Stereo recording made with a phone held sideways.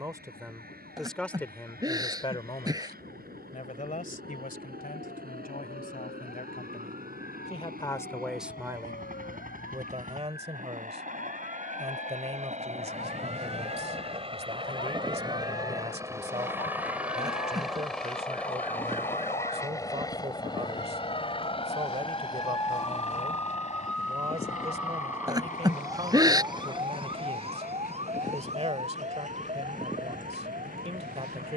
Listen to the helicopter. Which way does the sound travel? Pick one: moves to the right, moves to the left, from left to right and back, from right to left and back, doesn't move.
moves to the left.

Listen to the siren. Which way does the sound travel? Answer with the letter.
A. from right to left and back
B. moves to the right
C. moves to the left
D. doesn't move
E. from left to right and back
B.